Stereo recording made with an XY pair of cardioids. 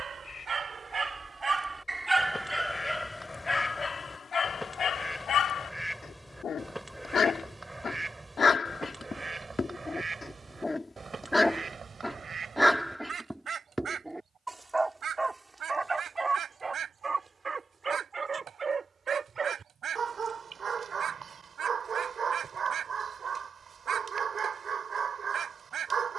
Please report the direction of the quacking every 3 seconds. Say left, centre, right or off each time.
left, centre, centre, right, right, right, right, right, right.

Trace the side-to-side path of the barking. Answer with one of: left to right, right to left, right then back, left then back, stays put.
left then back.